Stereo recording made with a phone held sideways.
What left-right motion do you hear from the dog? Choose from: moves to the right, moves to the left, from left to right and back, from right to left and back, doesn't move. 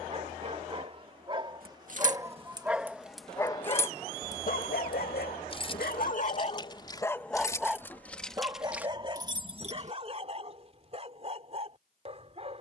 from right to left and back.